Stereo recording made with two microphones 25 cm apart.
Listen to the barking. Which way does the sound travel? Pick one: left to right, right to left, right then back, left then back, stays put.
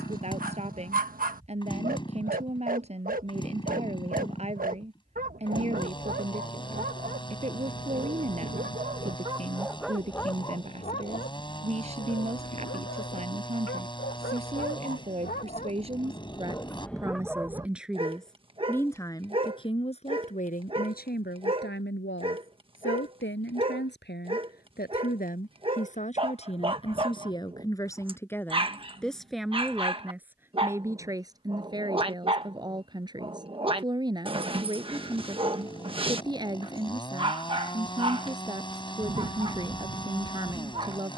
left then back.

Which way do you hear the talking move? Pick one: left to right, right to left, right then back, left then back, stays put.
left then back.